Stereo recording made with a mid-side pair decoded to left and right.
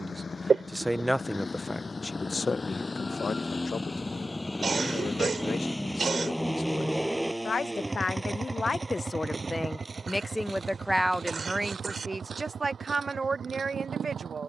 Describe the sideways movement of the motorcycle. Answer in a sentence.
In this clip you hear the motorcycle travel towards the right.